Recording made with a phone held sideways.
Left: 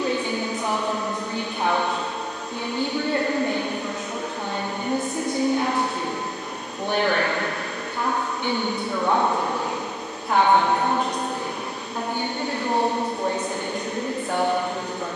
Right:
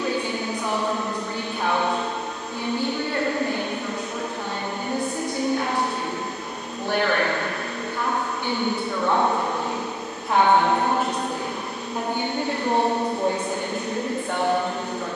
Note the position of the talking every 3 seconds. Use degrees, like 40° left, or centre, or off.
20° left, 20° left, 20° left, centre, 10° right.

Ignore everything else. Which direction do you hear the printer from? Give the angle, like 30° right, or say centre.
centre.